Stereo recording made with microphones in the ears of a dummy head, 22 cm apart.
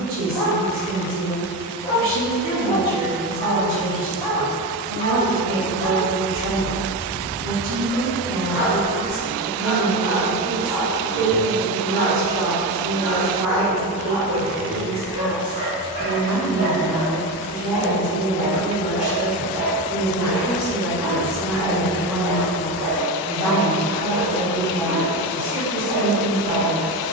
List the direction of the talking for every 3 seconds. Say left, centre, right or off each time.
right, right, right, right, right, right, centre, right, right.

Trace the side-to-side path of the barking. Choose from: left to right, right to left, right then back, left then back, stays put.
left to right.